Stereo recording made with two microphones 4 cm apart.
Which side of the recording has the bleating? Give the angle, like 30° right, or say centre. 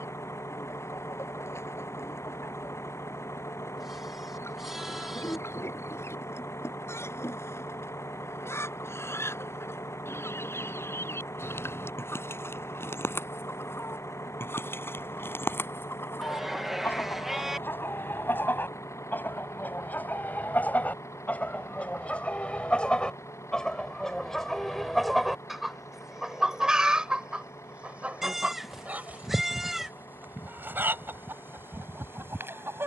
10° right.